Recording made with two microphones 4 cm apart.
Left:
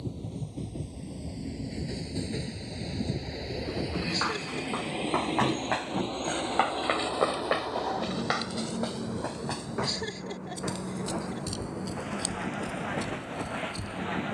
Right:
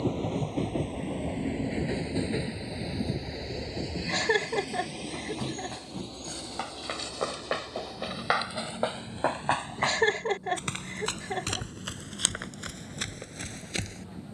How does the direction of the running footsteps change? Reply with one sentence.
You can hear the running footsteps move to the right.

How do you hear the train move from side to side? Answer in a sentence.
In this clip you hear the train go from the right side to the left.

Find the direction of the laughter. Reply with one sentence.
In this clip you hear the laughter on the right.